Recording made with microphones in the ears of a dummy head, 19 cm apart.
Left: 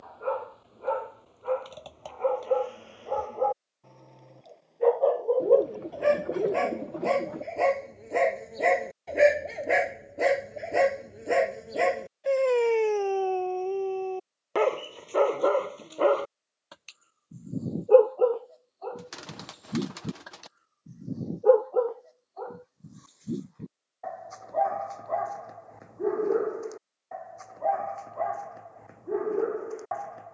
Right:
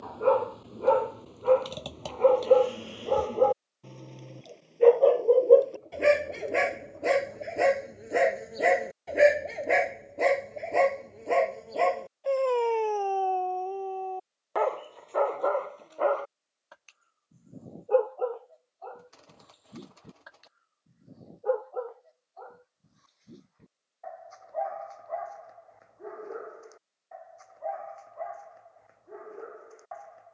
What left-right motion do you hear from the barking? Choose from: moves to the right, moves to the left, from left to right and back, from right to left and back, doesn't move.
moves to the left.